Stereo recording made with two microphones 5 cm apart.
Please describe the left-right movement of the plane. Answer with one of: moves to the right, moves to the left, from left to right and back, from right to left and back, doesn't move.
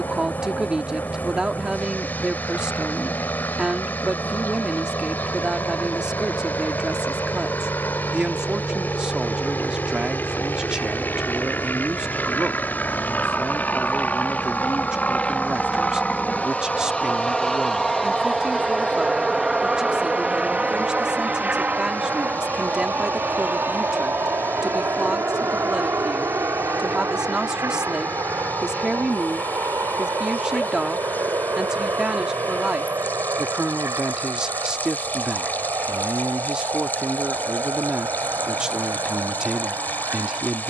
moves to the right.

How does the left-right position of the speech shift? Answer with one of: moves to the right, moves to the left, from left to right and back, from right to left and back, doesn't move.
doesn't move.